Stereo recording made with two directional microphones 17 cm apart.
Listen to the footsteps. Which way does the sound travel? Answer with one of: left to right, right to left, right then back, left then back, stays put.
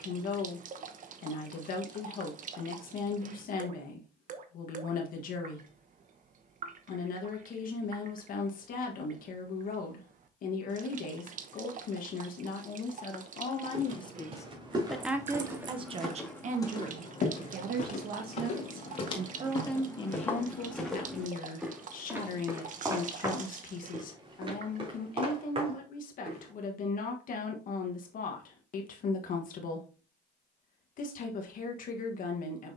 left then back.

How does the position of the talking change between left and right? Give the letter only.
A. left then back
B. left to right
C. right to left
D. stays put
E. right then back
E.